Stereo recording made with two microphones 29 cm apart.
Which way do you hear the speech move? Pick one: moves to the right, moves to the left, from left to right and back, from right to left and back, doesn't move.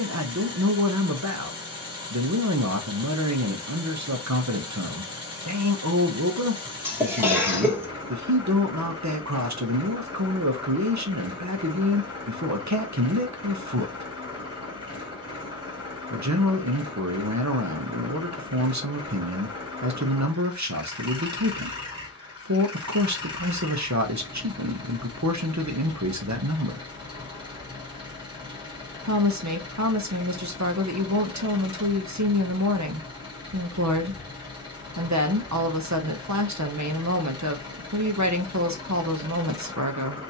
doesn't move.